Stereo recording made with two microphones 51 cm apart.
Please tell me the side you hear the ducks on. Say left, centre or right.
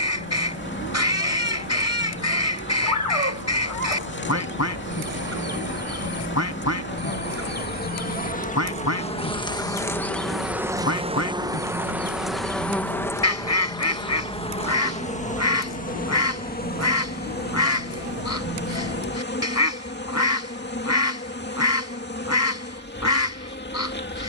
left.